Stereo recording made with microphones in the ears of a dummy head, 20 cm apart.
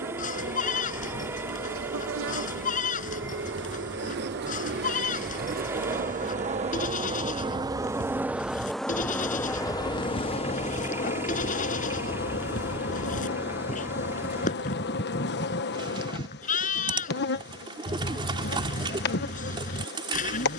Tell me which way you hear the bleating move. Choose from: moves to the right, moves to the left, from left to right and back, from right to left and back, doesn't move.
doesn't move.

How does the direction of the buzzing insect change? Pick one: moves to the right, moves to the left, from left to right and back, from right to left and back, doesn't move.
moves to the left.